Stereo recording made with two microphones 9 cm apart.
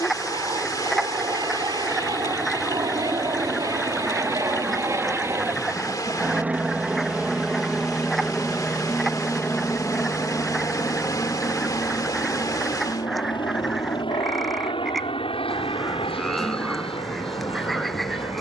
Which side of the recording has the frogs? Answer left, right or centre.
centre.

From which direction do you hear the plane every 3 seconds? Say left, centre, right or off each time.
right, right, centre, left, left, left.